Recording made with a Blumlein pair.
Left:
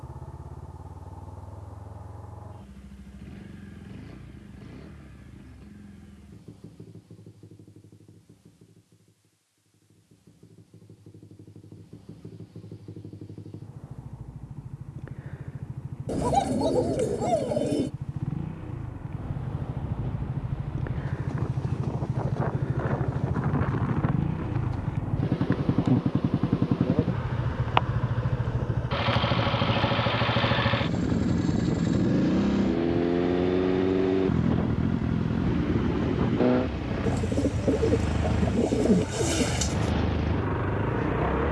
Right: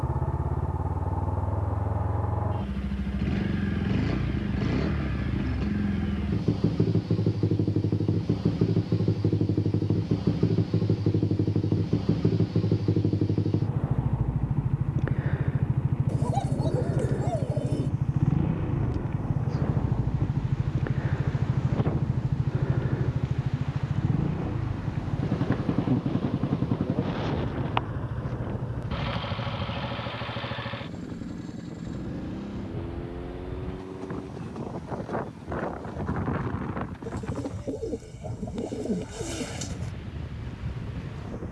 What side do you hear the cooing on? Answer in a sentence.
You can hear the cooing on the left.